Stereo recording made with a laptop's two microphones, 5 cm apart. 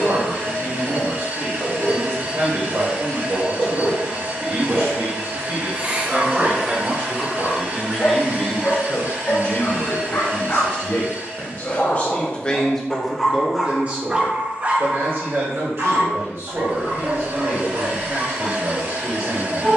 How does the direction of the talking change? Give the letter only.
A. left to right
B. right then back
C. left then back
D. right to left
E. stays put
C.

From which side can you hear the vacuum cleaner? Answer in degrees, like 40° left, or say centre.
60° right.